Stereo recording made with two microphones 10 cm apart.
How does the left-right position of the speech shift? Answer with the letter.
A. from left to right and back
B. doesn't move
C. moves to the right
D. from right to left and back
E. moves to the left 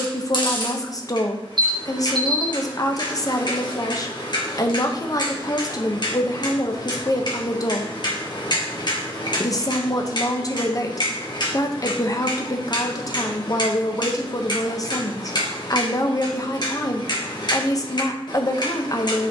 B.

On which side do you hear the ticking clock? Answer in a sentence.
In this clip you hear the ticking clock on the left.